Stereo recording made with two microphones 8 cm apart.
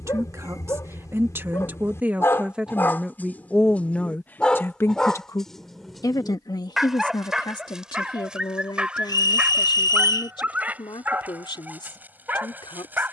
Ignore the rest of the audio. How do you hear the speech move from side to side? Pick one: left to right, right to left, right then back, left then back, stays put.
right to left.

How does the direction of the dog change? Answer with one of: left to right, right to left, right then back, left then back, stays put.
left to right.